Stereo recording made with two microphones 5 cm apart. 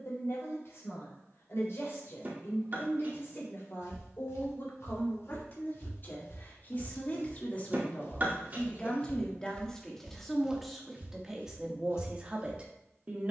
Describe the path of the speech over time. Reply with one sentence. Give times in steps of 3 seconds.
In this clip you hear the speech on the left from 0 s, in the centre from 9 s and on the right from 12 s.